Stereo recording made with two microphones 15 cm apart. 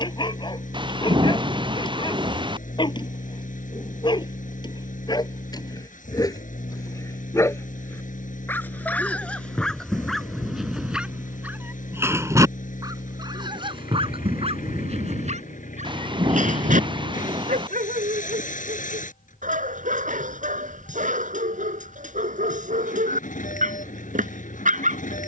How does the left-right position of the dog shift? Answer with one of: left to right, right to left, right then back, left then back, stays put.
left to right.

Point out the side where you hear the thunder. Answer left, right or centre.
right.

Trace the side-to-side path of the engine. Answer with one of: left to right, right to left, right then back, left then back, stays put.
stays put.